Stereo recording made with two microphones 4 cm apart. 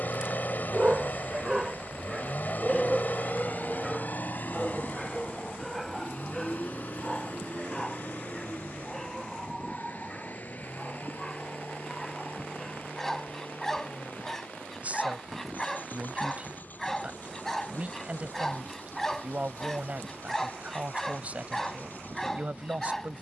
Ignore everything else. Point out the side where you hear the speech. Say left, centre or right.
right.